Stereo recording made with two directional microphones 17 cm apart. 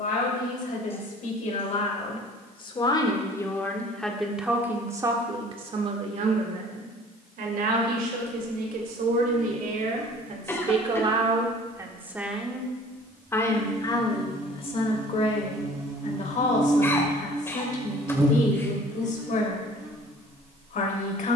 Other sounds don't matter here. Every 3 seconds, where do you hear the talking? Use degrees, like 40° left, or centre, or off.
40° left, 10° right, 60° right, 40° right, 20° left, 50° left, 50° left.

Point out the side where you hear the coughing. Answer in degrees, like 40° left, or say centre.
10° left.